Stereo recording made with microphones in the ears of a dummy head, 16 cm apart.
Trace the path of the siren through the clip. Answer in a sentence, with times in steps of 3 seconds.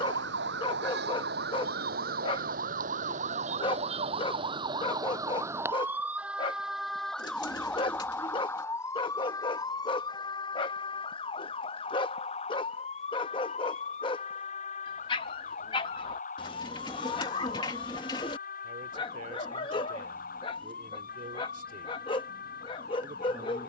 In this clip you hear the siren on the right from 0 s, in the centre from 6 s and on the left from 9 s.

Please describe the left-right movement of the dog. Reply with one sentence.
In this clip you hear the dog stay put.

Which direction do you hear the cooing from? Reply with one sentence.
In this clip you hear the cooing on the left.